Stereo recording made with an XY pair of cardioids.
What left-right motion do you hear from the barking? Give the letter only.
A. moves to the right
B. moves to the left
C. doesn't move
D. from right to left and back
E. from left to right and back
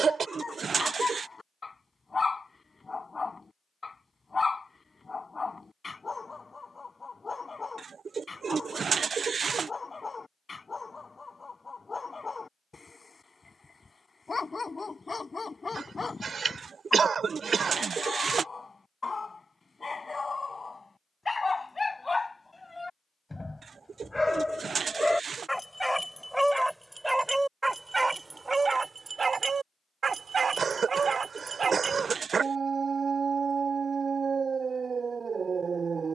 A.